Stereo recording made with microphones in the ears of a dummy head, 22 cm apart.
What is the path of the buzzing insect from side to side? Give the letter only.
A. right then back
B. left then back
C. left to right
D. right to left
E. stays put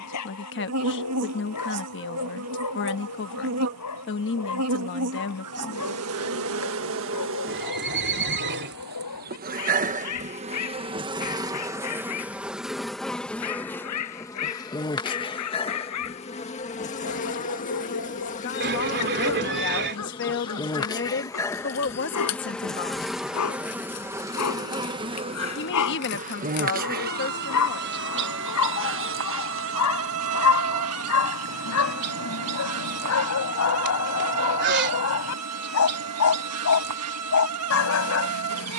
B.